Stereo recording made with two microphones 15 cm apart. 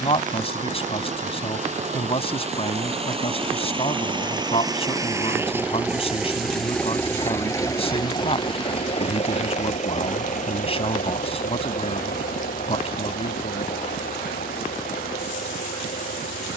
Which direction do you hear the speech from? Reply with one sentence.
You can hear the speech on the left.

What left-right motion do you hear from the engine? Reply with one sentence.
You can hear the engine go from the right side to the left.